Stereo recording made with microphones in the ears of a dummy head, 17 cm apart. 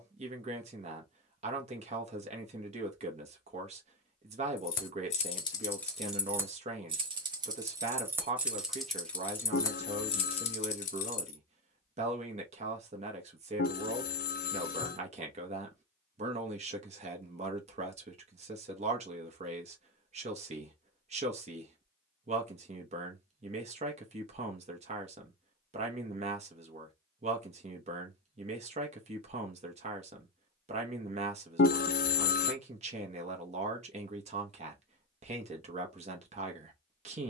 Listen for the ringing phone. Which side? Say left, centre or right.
left.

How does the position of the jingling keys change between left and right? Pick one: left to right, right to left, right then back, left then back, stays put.
right then back.